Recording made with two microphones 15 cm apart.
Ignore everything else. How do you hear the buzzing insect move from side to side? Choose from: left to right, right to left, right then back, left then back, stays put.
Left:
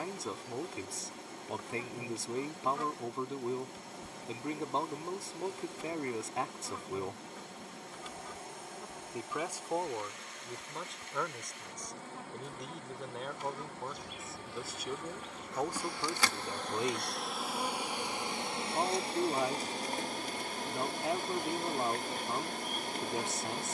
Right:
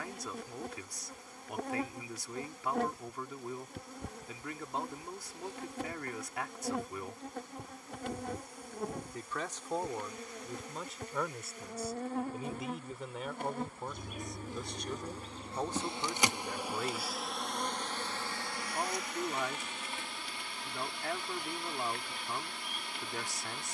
right to left.